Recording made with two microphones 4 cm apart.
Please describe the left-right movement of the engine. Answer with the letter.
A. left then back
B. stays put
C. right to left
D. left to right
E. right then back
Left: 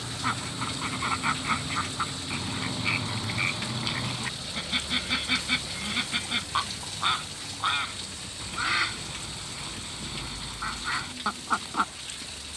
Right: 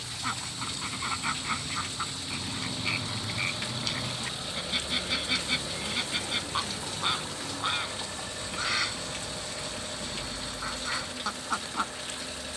D.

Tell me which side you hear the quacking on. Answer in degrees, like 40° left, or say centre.
20° left.